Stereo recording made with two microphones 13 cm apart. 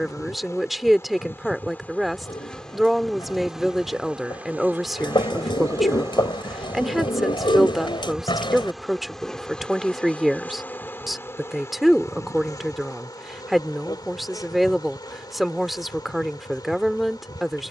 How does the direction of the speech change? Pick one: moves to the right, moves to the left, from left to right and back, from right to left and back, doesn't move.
doesn't move.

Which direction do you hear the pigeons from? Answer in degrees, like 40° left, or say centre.
40° left.